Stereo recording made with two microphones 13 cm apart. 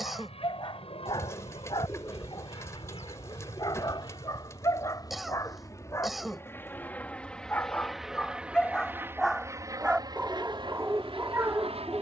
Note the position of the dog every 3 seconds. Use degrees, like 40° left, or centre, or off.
40° left, 30° left, 10° left, 10° right.